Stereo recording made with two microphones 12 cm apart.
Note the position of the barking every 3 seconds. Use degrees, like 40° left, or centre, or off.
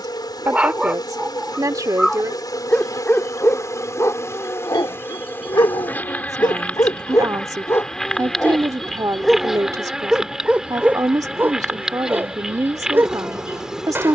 centre, 30° left, 20° left, 10° right, 20° right.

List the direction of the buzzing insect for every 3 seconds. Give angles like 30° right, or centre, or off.
30° left, 20° left, 10° left, centre, 10° right.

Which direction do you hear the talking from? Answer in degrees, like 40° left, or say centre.
30° right.